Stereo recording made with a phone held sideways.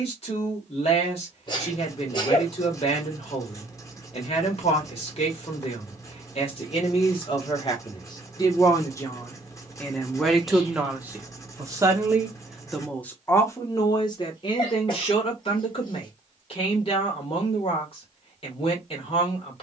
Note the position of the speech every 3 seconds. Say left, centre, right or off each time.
left, left, left, centre, left, left, left.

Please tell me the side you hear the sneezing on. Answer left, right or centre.
left.